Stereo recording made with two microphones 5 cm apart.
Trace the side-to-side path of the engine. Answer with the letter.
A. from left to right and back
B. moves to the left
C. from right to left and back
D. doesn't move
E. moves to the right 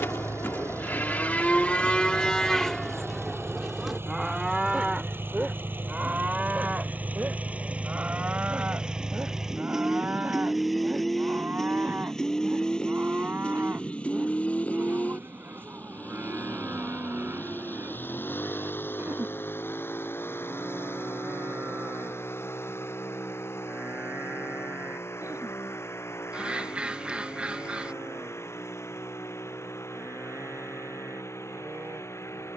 B.